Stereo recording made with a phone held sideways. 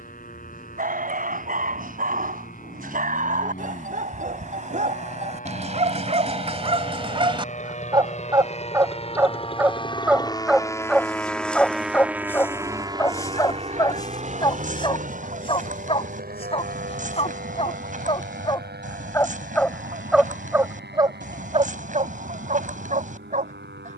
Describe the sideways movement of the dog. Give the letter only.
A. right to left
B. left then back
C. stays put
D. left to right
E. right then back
B.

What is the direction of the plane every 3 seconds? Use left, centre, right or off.
left, left, left, left, right, right, right, right.